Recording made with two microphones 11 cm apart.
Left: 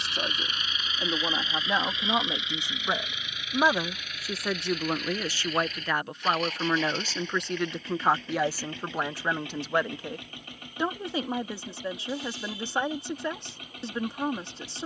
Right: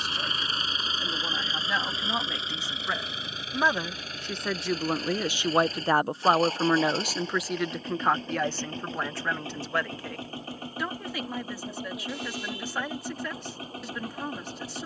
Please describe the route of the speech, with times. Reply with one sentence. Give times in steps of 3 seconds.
In this clip you hear the speech on the left from 0 s, in the centre from 3 s and on the left from 9 s.